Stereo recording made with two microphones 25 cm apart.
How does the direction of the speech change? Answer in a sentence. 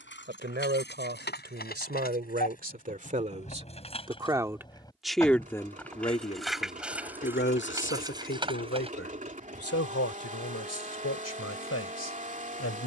You can hear the speech move from right to left.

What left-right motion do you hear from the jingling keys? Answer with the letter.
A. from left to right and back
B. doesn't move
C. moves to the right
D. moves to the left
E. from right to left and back
C.